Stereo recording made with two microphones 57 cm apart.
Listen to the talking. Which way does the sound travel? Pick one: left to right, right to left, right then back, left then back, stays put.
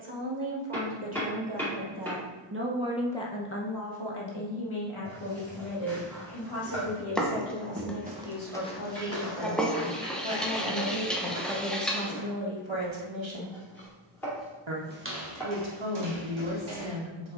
left then back.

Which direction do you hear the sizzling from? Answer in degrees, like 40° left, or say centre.
centre.